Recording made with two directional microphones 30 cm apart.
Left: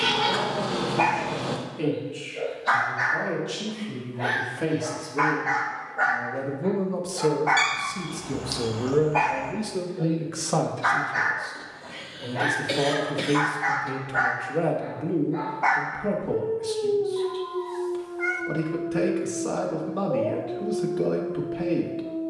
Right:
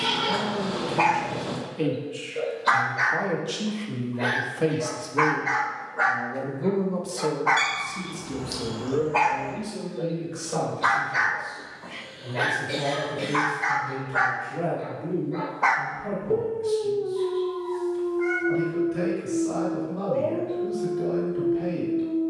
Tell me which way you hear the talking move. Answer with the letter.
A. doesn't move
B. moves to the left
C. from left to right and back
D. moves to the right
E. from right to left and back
B.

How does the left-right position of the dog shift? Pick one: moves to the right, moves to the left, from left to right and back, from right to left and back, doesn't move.
doesn't move.